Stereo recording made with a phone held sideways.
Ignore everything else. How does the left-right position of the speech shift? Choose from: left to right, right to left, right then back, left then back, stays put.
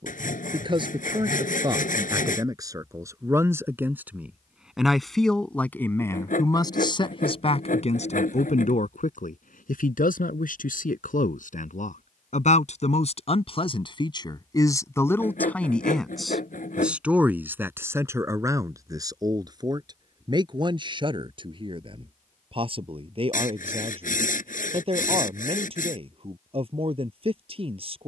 left then back.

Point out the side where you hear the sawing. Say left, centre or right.
left.